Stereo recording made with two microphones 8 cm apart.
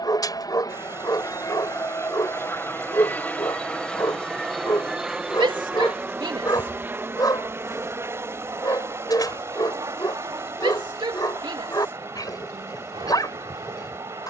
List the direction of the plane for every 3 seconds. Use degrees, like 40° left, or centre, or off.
40° left, centre, 30° right, 40° right, 50° right.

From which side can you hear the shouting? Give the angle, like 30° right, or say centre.
70° right.